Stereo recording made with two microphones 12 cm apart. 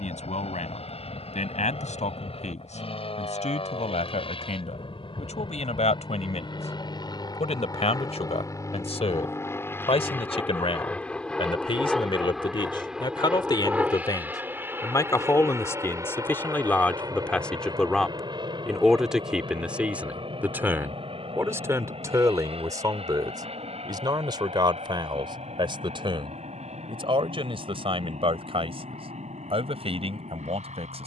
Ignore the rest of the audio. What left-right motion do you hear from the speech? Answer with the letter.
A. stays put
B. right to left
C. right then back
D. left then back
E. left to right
E.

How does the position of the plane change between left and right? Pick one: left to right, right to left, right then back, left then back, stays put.
left to right.